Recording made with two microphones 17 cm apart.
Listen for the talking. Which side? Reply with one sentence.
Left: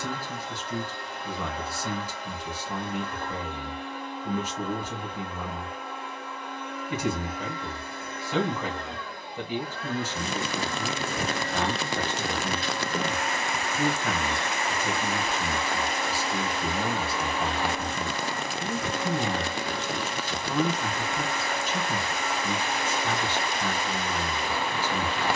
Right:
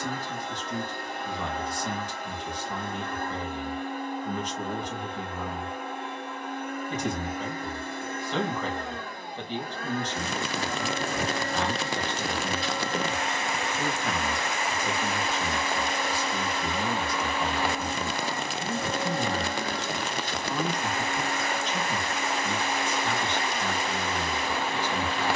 You can hear the talking in the centre.